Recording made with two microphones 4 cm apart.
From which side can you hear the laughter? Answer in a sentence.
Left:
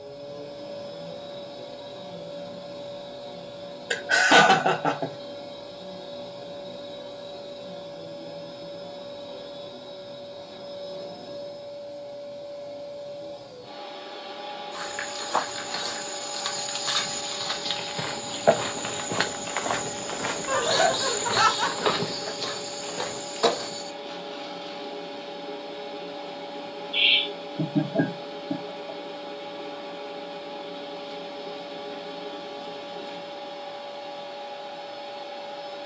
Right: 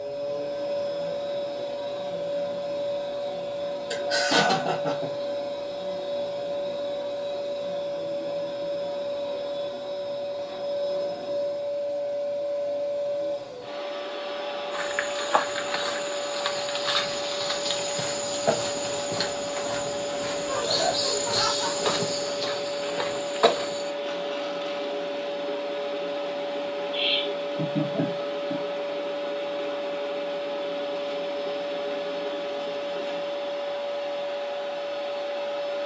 In this clip you hear the laughter on the left.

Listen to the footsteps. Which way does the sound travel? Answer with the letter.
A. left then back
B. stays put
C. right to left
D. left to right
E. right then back
A.